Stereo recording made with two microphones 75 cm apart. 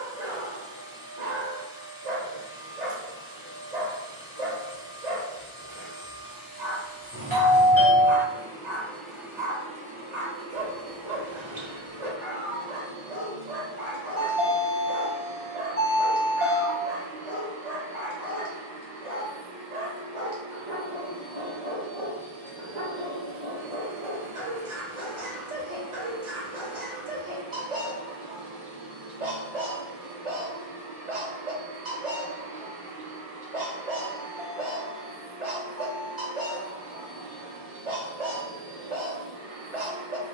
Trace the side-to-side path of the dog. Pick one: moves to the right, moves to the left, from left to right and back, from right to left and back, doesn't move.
doesn't move.